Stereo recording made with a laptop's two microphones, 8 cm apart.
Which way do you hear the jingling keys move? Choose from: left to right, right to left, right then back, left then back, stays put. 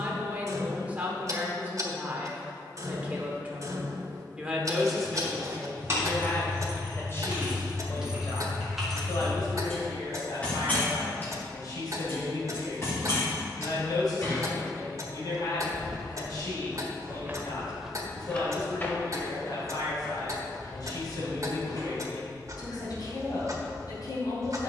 right to left.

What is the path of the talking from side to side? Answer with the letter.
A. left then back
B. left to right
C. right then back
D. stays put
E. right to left
E.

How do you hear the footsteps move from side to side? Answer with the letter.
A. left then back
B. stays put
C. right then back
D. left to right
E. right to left
E.